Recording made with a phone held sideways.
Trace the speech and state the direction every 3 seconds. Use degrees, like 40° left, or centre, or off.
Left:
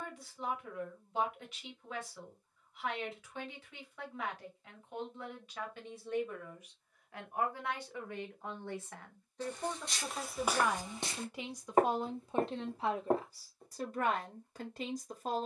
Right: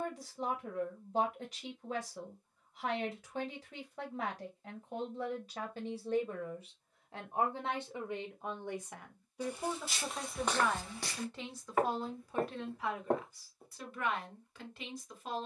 40° right, 40° right, 20° right, centre, 30° left.